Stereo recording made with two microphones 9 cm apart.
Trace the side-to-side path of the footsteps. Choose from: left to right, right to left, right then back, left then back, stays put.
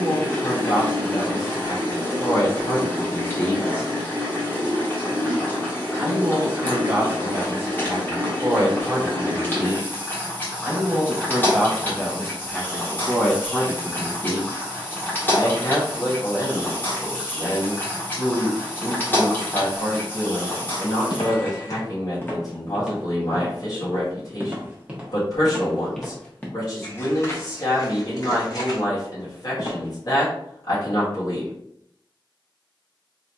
right then back.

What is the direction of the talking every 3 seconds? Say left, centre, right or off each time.
left, left, right, centre, left, left, left, left, left, left, left.